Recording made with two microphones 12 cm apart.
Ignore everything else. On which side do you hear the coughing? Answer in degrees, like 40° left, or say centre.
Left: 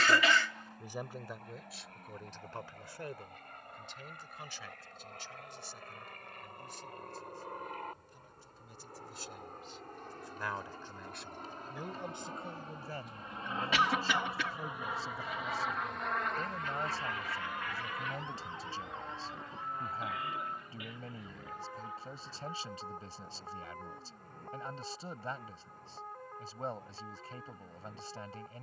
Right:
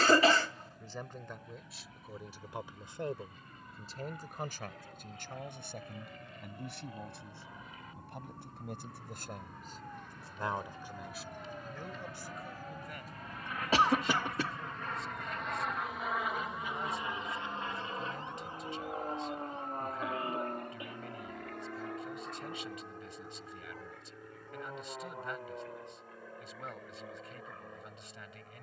40° right.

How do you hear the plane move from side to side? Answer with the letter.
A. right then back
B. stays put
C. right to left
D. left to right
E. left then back
D.